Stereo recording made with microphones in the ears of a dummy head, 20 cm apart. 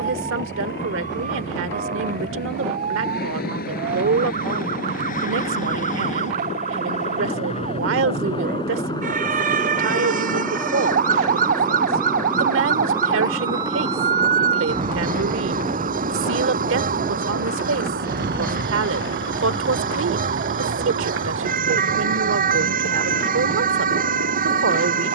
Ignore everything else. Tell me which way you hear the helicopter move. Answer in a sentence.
In this clip you hear the helicopter move to the right.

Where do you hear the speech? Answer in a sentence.
You can hear the speech on the right.